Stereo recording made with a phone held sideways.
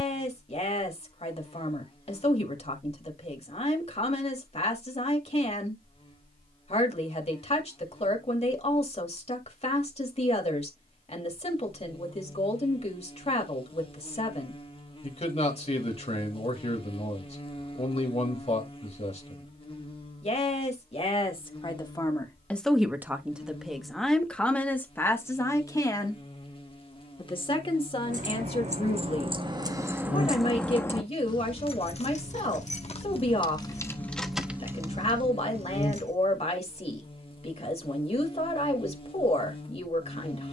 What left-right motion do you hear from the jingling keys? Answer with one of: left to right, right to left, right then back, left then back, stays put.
left then back.